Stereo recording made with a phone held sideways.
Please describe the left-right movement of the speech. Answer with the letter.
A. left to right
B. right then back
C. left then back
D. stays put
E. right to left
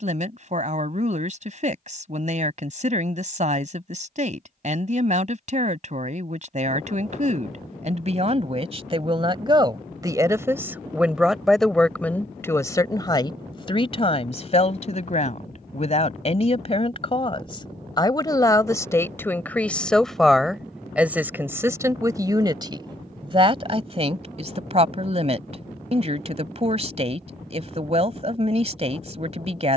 C.